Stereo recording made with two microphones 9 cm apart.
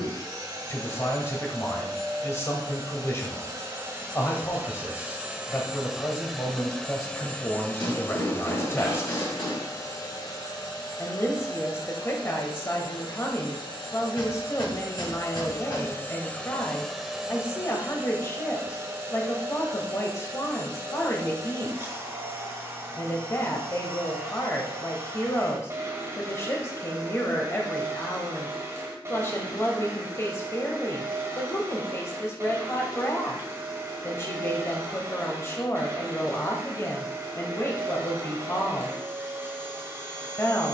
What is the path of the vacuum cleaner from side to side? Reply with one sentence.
In this clip you hear the vacuum cleaner go left and come back.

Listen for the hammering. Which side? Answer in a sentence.
In this clip you hear the hammering on the left.